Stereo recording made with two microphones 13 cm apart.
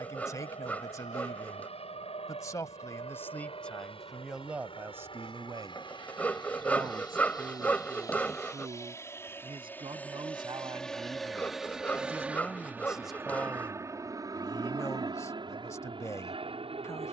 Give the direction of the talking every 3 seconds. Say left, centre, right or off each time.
left, centre, right, right, centre, left.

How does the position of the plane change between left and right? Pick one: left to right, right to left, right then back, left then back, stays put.
left to right.